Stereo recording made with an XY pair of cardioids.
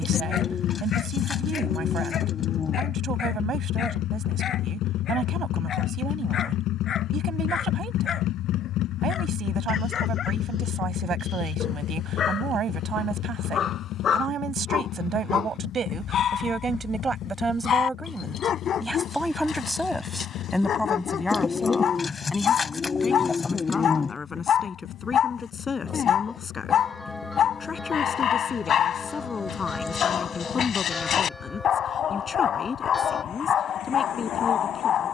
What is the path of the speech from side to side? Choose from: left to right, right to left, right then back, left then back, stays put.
right to left.